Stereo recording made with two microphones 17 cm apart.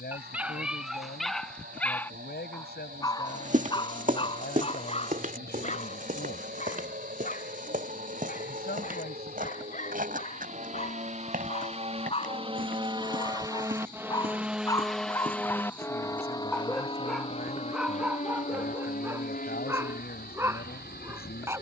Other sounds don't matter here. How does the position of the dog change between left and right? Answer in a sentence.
In this clip you hear the dog go left and come back.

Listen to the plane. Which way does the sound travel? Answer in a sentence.
In this clip you hear the plane travel towards the left.